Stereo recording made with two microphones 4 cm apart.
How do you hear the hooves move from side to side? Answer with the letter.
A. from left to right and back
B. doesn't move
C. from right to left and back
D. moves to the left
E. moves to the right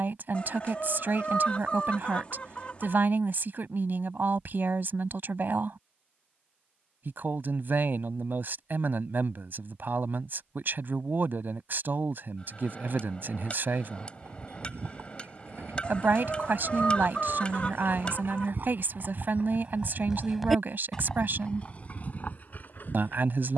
D.